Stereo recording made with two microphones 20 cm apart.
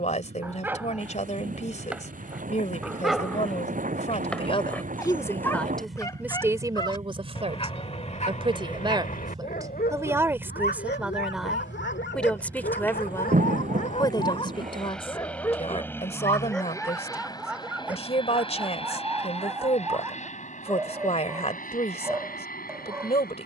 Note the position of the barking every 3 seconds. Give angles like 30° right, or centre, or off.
10° right, 10° left, 30° left, 60° left, 50° left, centre, 10° right, 10° right.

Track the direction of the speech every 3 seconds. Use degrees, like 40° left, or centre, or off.
40° left, 20° left, 20° right, 10° right, 20° left, 30° left, 30° left, 30° left.